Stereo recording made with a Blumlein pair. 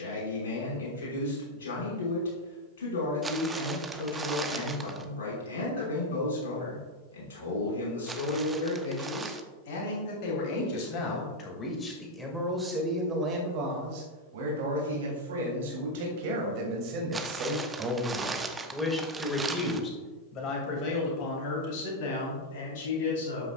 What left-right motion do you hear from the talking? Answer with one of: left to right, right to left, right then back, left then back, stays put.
right then back.